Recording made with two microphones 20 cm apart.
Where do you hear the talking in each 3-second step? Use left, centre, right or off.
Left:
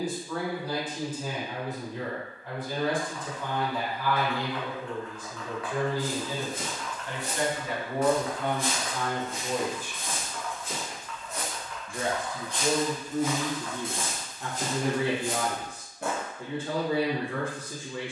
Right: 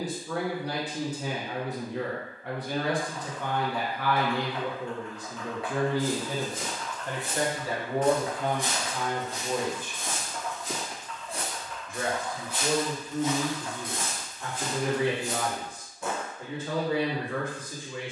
right, right, right, centre, left, left.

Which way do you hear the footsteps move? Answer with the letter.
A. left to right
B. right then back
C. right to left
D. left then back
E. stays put
B.